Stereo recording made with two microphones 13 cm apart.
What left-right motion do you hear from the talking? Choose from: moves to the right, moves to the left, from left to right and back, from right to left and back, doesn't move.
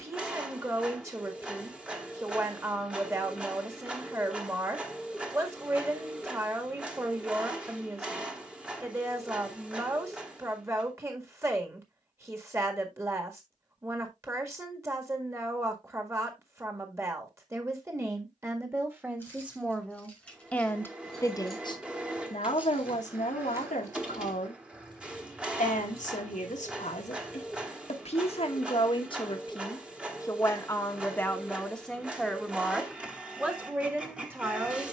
from right to left and back.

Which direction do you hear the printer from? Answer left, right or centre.
centre.